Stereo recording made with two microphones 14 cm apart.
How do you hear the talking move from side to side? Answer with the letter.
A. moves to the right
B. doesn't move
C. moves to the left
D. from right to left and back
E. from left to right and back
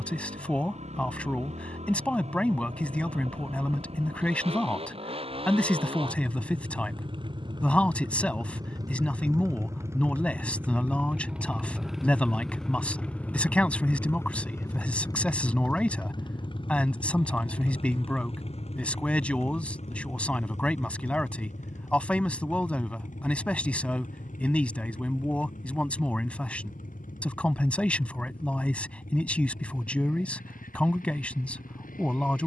B.